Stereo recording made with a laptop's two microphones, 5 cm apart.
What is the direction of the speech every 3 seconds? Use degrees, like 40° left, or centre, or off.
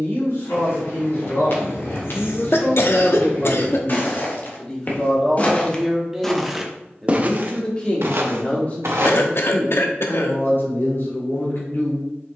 60° left, 20° left, 20° left, 50° left.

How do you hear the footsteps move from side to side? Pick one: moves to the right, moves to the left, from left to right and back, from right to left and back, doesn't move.
moves to the right.